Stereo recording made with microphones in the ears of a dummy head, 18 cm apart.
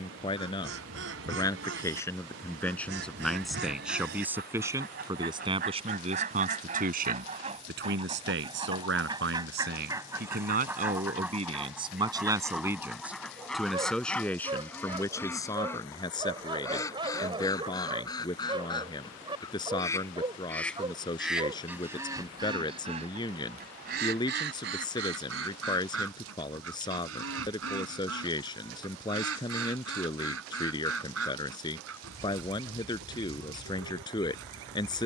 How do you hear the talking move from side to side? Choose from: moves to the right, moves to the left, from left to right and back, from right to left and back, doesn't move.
from left to right and back.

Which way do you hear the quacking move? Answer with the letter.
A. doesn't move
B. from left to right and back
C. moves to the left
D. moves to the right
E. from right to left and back
E.